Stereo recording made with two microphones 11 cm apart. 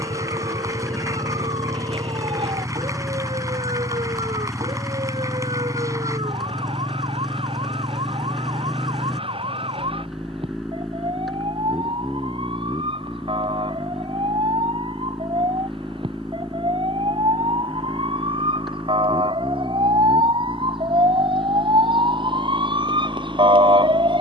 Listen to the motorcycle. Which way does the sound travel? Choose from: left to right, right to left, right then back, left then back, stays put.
stays put.